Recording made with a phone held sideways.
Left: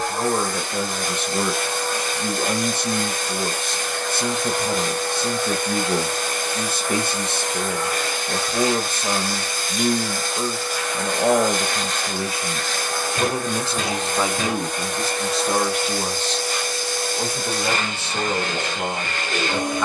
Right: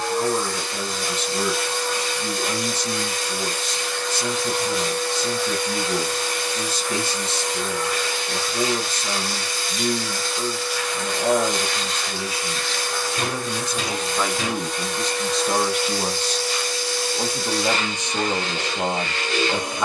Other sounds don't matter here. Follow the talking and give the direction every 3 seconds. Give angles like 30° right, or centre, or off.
50° left, 50° left, 50° left, 50° left, 30° left, 10° right, 10° right.